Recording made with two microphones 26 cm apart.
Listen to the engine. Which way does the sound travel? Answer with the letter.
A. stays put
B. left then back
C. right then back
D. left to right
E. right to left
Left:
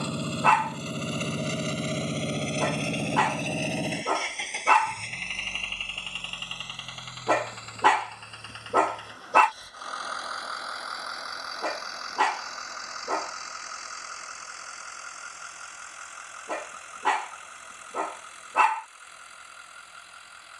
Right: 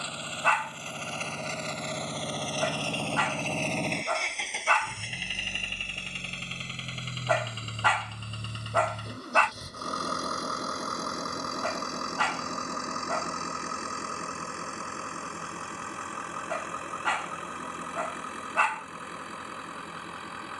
D.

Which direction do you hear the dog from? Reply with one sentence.
In this clip you hear the dog on the left.